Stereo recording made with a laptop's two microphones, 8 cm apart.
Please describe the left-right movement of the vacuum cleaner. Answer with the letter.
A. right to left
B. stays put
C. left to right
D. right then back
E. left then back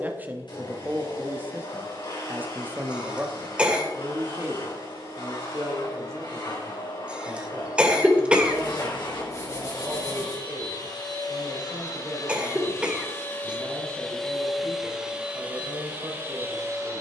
C.